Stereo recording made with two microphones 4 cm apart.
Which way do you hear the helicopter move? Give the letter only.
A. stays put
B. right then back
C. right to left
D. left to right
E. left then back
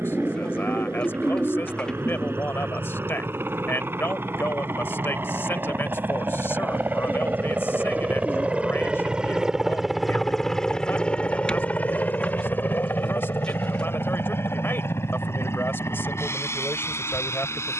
C.